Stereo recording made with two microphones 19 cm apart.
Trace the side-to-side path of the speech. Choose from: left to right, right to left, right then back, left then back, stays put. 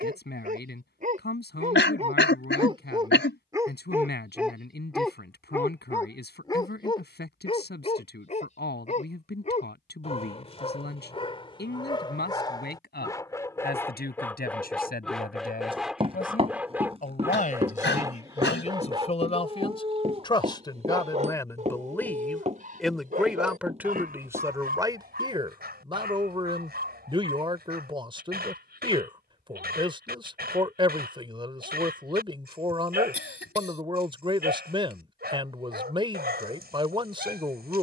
left to right.